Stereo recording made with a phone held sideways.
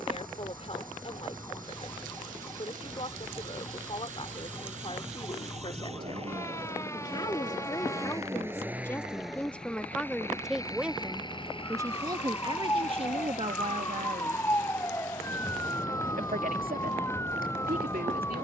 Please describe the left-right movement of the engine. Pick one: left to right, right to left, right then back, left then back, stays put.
right to left.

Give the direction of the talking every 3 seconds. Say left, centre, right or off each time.
left, left, left, centre, right, right.